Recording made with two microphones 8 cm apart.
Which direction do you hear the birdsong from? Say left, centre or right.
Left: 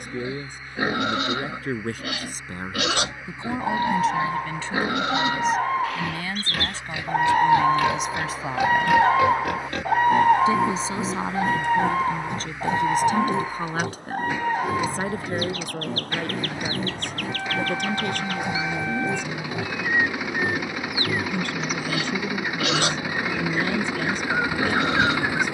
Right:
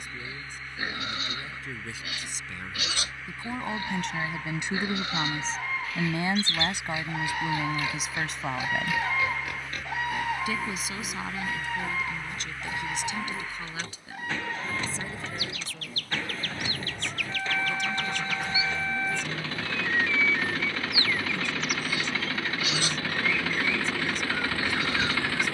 left.